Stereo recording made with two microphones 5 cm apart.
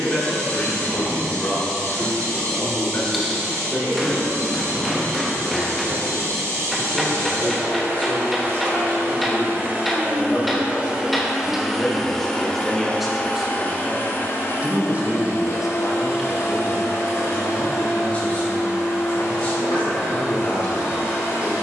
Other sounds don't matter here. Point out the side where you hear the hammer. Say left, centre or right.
centre.